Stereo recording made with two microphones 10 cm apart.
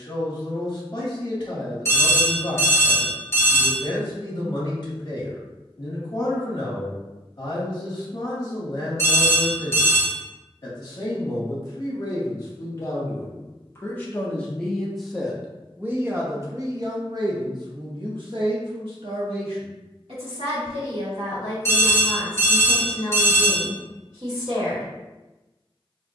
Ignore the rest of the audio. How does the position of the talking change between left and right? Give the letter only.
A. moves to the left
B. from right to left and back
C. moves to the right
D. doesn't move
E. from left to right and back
C.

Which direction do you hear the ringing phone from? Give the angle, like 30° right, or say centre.
30° left.